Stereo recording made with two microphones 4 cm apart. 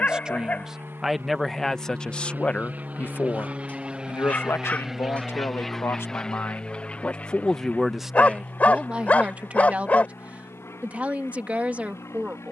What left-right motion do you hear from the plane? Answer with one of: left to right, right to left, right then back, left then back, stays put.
right to left.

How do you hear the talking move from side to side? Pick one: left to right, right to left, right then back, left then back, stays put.
left then back.